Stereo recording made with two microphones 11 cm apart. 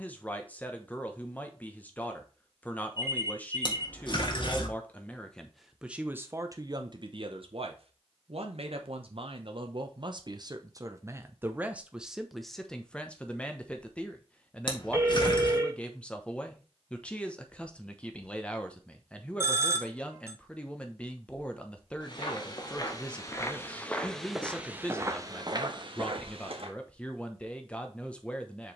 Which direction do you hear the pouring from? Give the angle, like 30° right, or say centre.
50° left.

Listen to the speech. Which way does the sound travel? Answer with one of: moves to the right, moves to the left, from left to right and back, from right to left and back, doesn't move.
from left to right and back.